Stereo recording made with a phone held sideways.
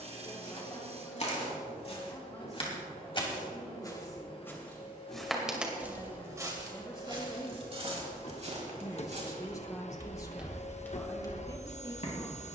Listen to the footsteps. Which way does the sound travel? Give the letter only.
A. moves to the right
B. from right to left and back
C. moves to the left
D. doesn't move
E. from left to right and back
E.